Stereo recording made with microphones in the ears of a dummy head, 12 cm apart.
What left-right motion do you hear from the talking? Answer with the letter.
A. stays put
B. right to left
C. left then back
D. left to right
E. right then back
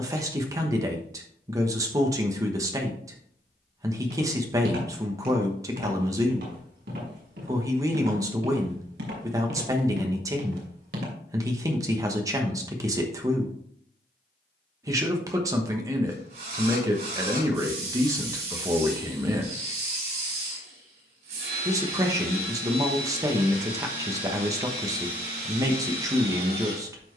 A.